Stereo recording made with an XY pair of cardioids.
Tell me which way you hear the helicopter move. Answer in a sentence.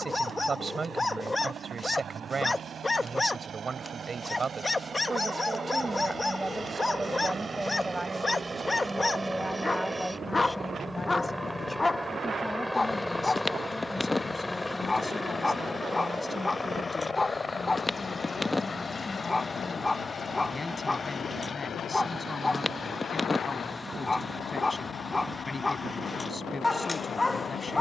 In this clip you hear the helicopter travel towards the left.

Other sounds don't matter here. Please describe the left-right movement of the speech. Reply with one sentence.
In this clip you hear the speech travel towards the left.